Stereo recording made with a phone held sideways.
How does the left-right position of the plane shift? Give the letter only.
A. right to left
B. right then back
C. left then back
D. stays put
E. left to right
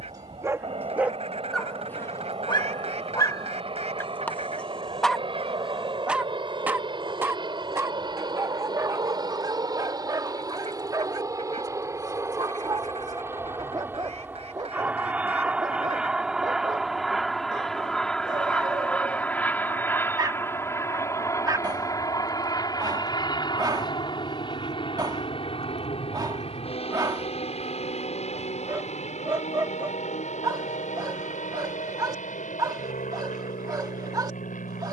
A.